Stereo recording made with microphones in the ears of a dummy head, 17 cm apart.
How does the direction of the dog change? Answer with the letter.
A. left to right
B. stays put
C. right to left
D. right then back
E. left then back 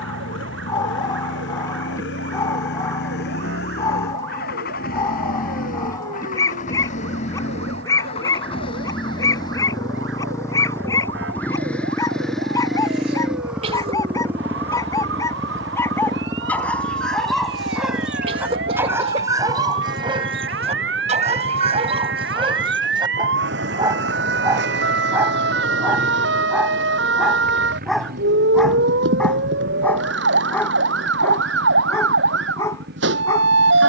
D.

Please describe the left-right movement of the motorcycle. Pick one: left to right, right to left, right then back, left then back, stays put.
left to right.